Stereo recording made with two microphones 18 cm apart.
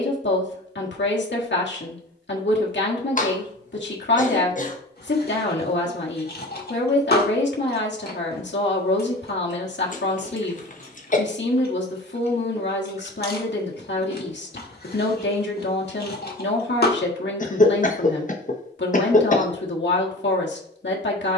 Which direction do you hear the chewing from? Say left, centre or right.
left.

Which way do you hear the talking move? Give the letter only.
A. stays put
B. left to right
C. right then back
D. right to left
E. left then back
A.